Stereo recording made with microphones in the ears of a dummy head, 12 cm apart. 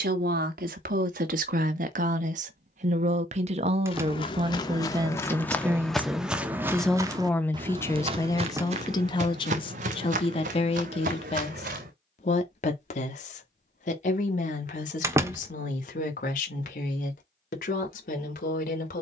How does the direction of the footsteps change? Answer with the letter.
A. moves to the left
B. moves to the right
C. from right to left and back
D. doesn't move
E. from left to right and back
B.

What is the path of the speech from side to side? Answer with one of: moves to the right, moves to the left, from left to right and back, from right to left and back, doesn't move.
moves to the left.